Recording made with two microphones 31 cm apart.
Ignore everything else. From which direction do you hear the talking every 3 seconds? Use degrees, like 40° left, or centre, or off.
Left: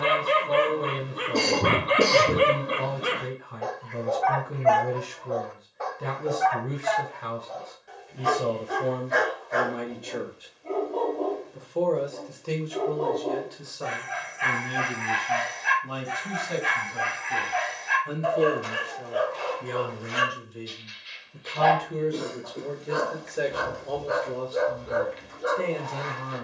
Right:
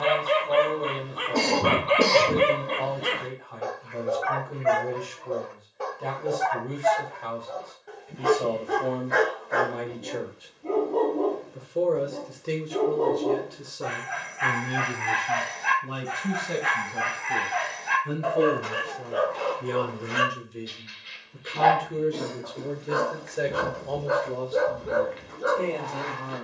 30° left, 30° left, 30° left, centre, 40° right, 60° right, 40° right, 10° right, 20° left.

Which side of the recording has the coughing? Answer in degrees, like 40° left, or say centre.
20° left.